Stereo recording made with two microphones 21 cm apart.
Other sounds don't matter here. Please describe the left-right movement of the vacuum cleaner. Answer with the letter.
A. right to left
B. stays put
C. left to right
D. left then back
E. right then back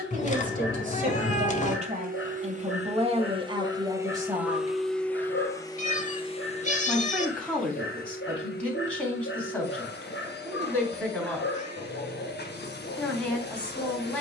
A.